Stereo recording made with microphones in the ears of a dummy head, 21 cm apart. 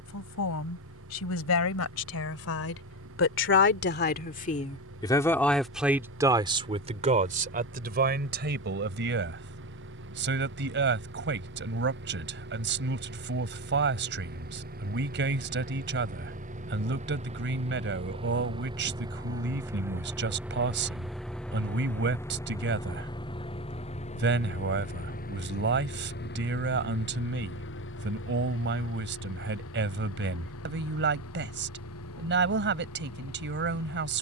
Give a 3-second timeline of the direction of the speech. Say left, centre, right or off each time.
left, left, right, right, right, right, right, right, right, right, right, right.